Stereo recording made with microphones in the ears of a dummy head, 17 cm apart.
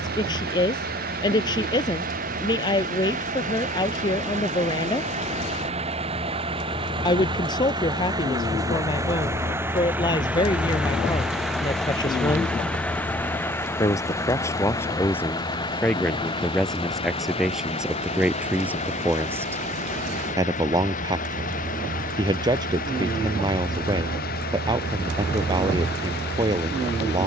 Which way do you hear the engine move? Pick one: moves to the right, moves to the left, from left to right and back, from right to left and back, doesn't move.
moves to the left.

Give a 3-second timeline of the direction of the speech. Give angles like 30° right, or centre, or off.
20° left, 20° left, 20° left, 20° left, 20° left, centre, 10° right, 20° right, 20° right.